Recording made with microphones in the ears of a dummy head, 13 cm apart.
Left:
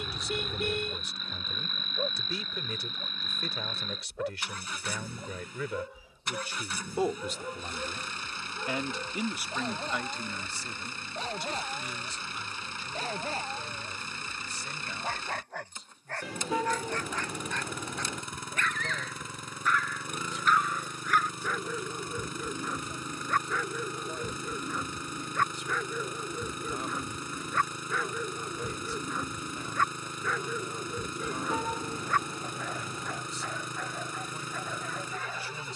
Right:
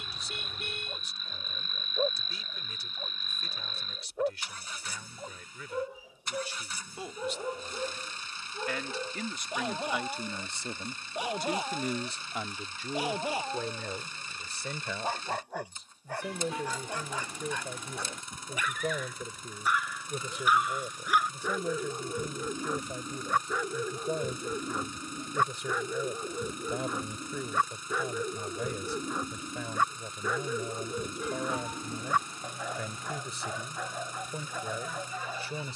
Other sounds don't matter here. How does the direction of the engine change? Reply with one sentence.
You can hear the engine stay put.